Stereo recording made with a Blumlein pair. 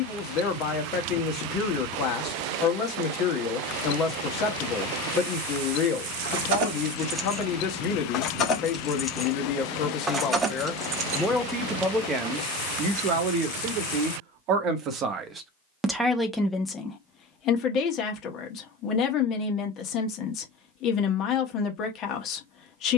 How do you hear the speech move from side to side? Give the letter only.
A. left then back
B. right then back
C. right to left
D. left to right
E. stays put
B.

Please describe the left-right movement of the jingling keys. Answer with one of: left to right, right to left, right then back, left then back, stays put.
left then back.